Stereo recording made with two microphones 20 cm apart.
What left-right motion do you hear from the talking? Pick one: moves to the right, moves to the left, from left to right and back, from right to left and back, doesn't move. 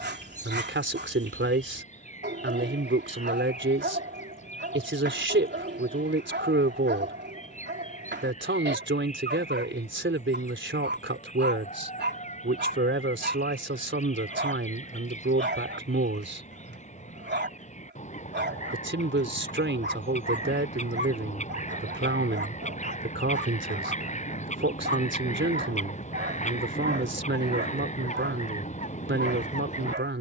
doesn't move.